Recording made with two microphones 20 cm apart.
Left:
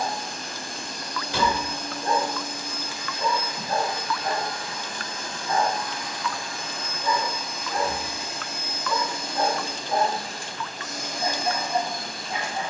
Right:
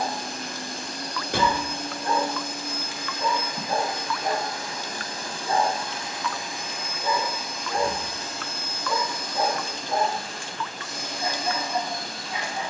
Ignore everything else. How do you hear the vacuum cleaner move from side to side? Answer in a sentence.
You can hear the vacuum cleaner move to the left.